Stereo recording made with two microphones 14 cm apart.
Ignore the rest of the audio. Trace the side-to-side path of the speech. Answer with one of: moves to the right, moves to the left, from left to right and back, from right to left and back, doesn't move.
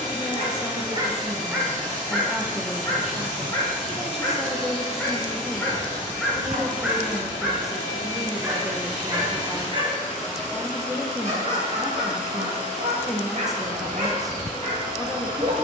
doesn't move.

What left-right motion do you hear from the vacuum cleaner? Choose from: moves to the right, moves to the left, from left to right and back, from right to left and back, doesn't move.
doesn't move.